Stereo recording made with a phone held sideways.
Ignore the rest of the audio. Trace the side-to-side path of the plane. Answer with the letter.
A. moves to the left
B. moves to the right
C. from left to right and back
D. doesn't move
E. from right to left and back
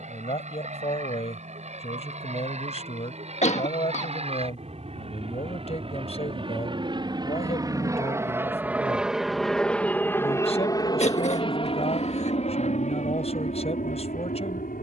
A.